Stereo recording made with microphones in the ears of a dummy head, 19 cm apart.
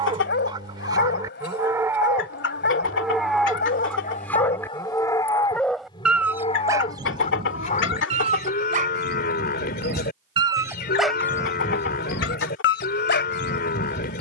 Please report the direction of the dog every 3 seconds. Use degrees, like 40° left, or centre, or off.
50° left, 30° left, 20° right, 10° right, 50° left.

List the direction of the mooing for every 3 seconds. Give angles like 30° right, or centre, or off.
10° right, 10° left, 30° left, 40° left, 40° left.